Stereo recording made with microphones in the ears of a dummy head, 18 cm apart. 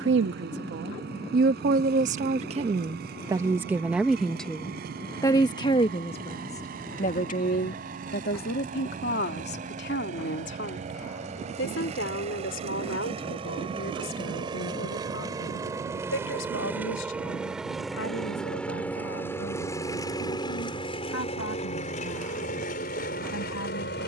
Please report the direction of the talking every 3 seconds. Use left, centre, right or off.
right, centre, left, left, left, left, left, left.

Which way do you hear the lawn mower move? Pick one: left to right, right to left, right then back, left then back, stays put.
right to left.